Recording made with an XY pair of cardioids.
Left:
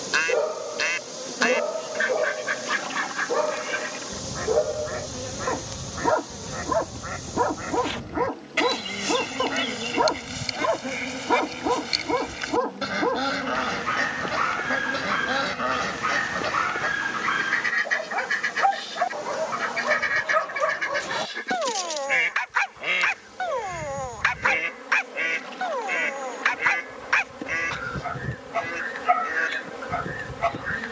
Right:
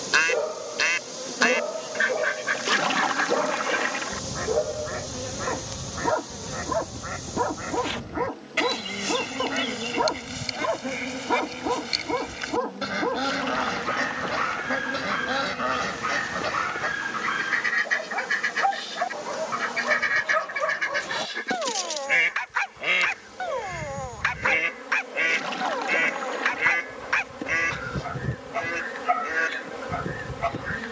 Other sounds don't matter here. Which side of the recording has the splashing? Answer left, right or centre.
right.